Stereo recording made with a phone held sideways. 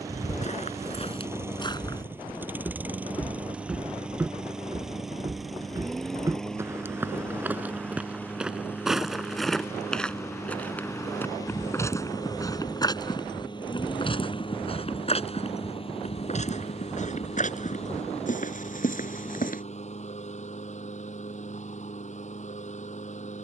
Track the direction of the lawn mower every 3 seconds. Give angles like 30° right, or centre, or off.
10° right, centre, 10° left, 20° left, 30° left, 40° left, 50° left, 50° left.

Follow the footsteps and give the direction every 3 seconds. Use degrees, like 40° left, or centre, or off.
40° left, 10° right, 10° right, 10° left, 30° left, 50° left, 60° left, off.